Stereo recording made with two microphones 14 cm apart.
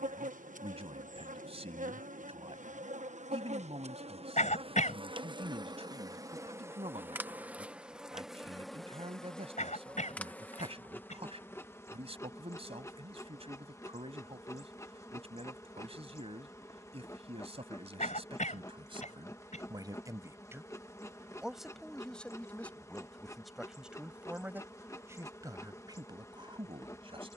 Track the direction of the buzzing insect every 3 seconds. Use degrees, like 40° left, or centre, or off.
70° right, 40° right, 10° right, 10° left, 20° left, 20° left, 20° left, 20° left, 20° left.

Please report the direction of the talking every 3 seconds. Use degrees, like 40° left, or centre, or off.
50° right, 50° right, 50° right, 50° right, 50° right, 50° right, 30° right, centre, 30° right.